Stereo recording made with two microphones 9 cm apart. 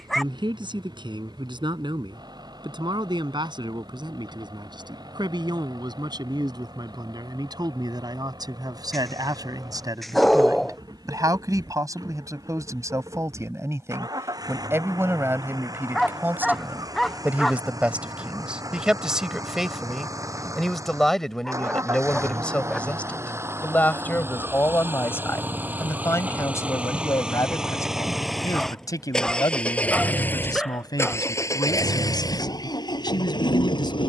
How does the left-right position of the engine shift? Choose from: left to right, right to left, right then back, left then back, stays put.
right to left.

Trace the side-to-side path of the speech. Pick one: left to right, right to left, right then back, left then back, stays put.
right to left.